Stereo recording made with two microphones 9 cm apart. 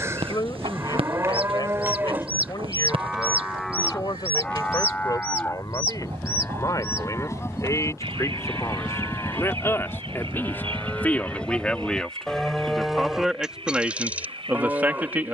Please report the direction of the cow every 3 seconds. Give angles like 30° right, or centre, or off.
30° right, 10° left, 30° left, 20° left, 10° right.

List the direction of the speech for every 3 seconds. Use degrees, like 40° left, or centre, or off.
50° left, 50° left, 40° left, 20° left, 10° right.